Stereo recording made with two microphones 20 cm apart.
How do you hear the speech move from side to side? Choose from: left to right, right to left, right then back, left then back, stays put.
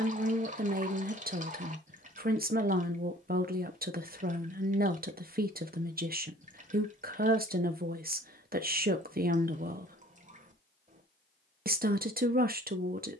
stays put.